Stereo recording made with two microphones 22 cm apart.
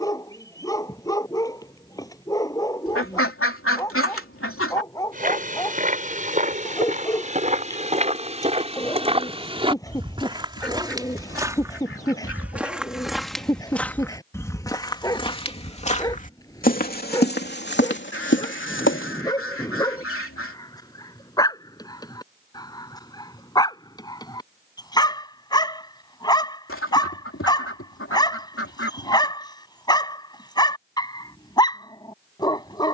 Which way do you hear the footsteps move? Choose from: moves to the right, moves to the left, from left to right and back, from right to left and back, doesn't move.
moves to the left.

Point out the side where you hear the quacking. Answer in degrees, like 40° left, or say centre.
80° left.